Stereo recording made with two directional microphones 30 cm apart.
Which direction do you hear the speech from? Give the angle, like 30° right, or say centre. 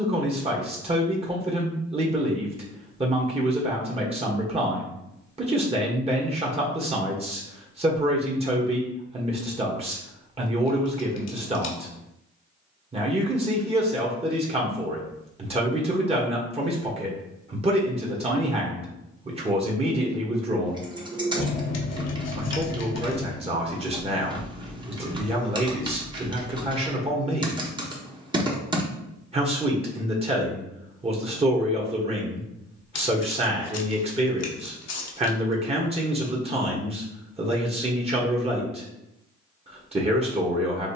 20° right.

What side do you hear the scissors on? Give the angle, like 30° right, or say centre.
60° left.